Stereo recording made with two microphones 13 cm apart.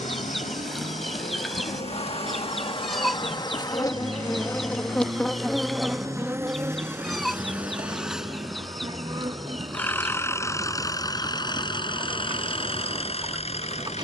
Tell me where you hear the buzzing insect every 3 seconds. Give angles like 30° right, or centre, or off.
50° left, 20° left, 20° right, 30° right, 30° right.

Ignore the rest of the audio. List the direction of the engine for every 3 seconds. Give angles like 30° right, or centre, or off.
50° right, 30° right, 10° right, 20° left, 50° left.